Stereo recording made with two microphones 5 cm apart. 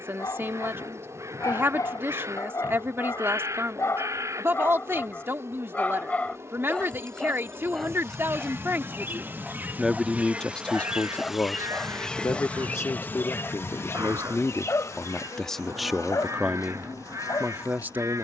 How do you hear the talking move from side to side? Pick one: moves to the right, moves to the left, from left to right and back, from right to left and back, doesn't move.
from right to left and back.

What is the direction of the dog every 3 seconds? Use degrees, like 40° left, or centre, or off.
70° left, 50° left, 10° left, centre, 40° left, 80° left.